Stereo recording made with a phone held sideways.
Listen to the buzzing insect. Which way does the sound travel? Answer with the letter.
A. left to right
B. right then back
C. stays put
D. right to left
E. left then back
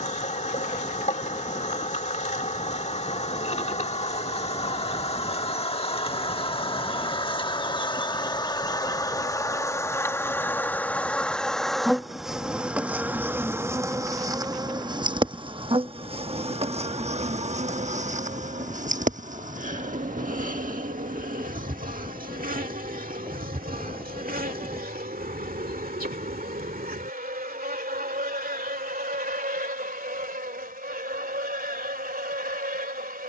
A.